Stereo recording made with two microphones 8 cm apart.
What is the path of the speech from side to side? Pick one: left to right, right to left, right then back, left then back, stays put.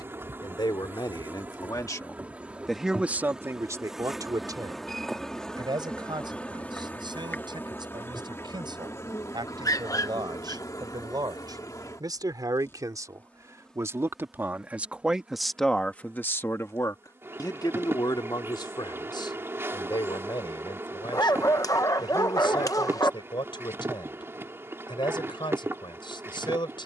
right then back.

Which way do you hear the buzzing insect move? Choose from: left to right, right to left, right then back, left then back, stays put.
left then back.